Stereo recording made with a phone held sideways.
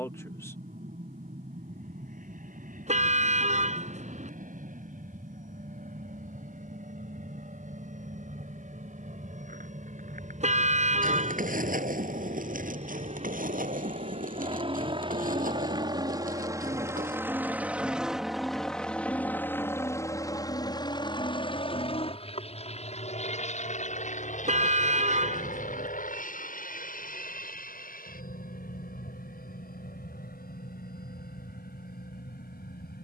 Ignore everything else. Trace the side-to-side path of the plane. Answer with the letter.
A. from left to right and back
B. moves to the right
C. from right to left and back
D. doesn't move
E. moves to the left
E.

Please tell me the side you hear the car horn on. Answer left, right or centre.
right.